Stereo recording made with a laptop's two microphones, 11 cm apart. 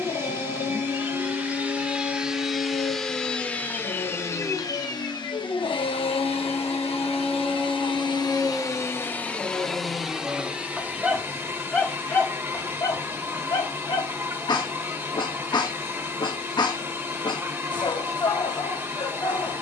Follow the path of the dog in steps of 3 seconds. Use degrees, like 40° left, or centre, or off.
50° left, 50° left, 10° left, 20° right, 30° left, 40° left, 40° left.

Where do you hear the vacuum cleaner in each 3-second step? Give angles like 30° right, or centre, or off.
10° right, 30° left, 50° left, 10° right, 20° right, 20° right, 20° right.